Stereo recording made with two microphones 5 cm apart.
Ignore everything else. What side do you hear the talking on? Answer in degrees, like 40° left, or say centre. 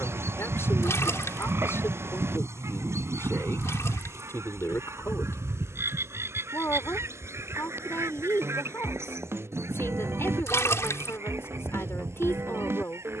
60° left.